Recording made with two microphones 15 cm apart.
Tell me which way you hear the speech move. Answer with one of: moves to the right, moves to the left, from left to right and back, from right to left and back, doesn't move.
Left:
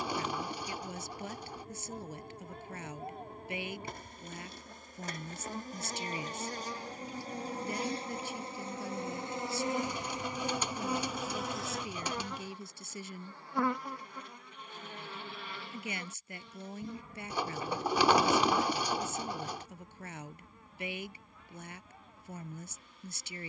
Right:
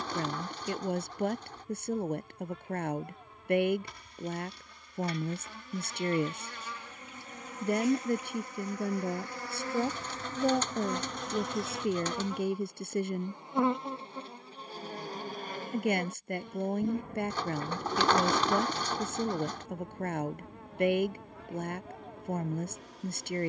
doesn't move.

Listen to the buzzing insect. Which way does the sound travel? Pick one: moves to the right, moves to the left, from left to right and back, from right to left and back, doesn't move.
moves to the right.